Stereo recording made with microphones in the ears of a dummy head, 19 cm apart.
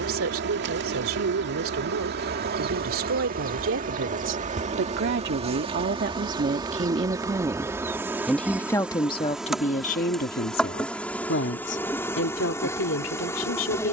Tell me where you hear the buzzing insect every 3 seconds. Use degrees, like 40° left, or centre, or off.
50° right, 30° right, 10° right, centre, 10° left.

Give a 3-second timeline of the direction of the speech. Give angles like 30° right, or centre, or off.
60° right, 50° right, 10° right, 40° left, 60° left.